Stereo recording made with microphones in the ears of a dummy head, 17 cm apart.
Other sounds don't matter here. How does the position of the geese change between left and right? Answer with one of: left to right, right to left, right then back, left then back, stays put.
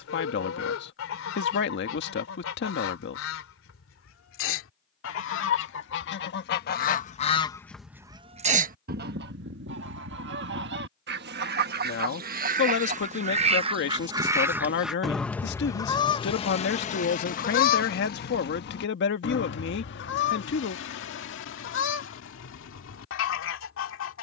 right then back.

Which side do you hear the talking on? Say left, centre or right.
left.